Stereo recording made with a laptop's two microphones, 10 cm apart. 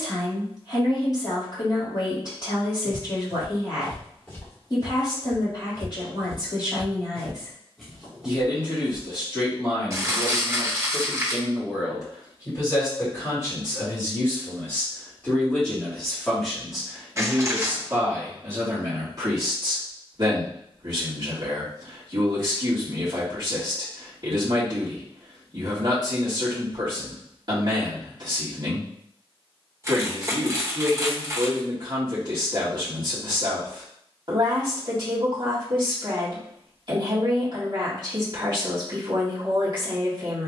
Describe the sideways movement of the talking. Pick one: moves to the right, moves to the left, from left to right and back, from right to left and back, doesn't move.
moves to the right.